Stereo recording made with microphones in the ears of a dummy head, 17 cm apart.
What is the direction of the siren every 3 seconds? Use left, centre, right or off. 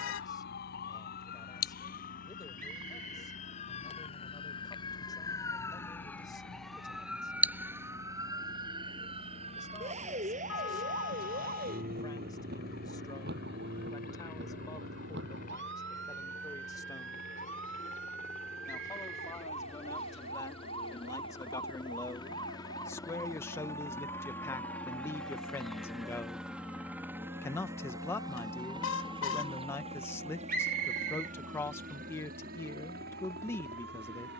left, left, centre, right, right, right, right, right, right, right, right, right.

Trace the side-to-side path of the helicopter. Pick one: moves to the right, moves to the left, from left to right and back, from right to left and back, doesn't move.
moves to the right.